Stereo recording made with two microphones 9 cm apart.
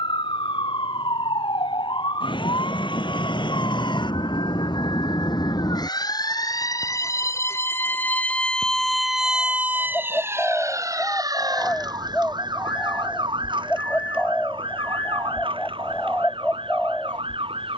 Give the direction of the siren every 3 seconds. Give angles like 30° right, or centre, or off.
70° left, 60° left, 30° left, 30° right, 60° right, 70° right.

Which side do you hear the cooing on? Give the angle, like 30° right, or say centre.
10° left.